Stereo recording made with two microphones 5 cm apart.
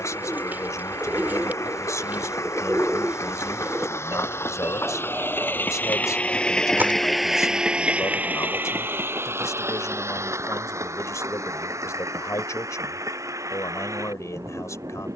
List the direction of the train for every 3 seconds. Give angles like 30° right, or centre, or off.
70° left, 50° left, 10° right, 60° right, 70° right.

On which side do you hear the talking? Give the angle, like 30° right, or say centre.
70° left.